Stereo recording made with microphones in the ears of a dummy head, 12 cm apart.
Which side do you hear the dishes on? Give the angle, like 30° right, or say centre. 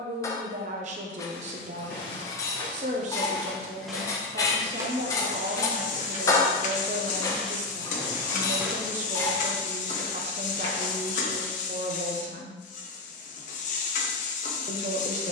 20° left.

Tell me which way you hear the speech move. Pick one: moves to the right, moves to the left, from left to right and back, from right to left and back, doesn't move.
doesn't move.